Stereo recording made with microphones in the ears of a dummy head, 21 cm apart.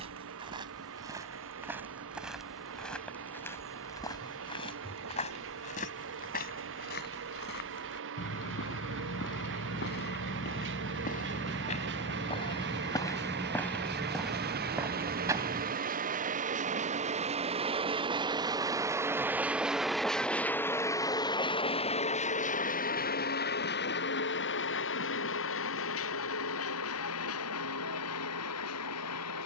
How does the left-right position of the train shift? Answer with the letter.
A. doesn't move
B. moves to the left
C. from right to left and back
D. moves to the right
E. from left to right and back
B.